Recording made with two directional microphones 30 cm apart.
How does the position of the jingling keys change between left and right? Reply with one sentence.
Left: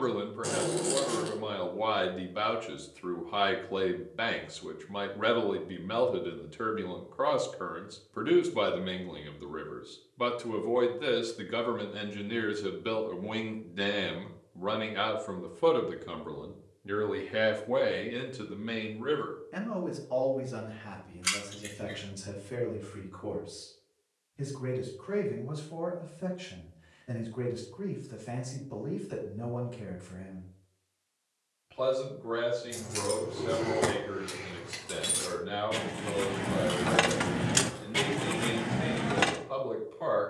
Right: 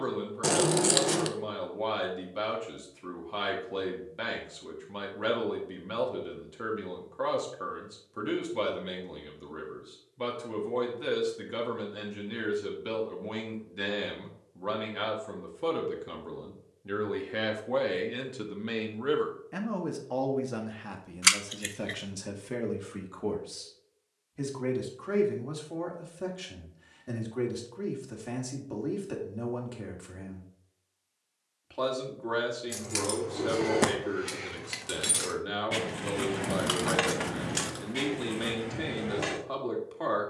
You can hear the jingling keys move from right to left.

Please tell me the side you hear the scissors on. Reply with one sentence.
You can hear the scissors on the right.